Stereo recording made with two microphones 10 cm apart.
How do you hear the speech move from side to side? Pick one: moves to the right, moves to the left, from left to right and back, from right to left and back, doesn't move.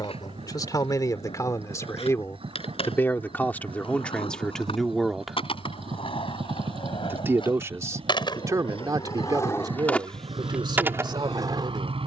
moves to the right.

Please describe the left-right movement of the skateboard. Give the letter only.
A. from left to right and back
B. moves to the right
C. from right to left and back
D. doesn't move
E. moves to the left
B.